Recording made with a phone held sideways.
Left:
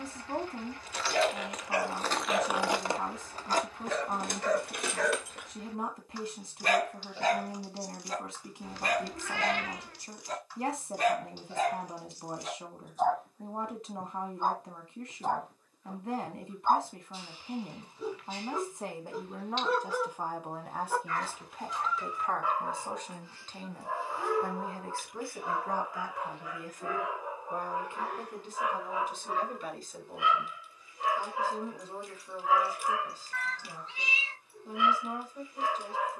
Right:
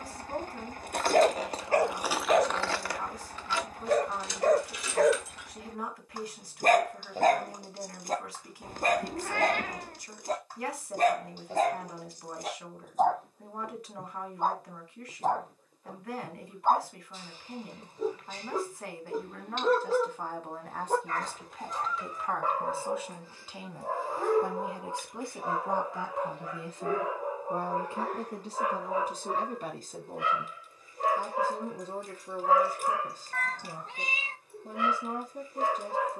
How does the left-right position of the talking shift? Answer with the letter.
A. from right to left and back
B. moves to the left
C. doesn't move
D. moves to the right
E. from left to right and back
D.